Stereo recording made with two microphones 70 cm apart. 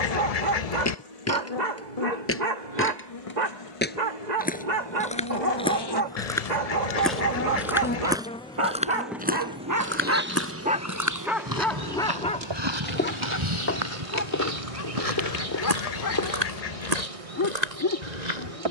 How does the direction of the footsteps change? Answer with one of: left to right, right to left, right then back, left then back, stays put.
left to right.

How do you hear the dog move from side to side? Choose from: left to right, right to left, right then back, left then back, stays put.
right to left.